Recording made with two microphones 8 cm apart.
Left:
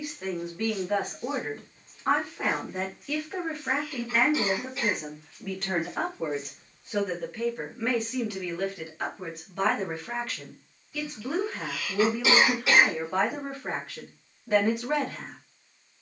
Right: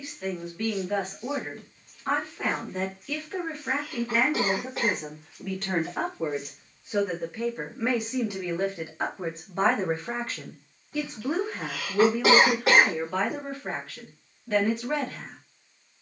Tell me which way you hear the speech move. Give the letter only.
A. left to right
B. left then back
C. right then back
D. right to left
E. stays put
C.